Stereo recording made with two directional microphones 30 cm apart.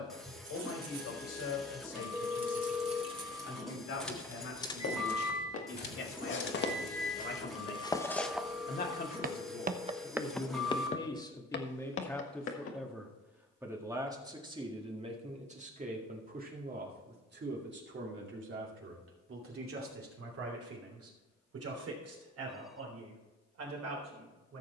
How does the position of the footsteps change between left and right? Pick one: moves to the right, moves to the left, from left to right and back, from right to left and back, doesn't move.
from left to right and back.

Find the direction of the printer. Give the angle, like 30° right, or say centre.
centre.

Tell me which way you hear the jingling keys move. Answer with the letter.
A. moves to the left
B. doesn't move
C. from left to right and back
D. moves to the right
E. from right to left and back
A.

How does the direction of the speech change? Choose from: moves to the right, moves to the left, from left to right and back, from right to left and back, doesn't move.
moves to the right.